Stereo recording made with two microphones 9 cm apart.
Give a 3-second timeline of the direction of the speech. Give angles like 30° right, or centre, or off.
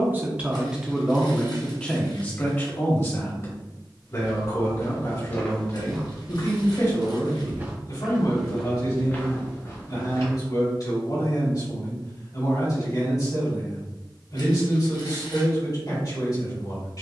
centre, 40° left, 50° left, 50° left, 50° left, 50° left.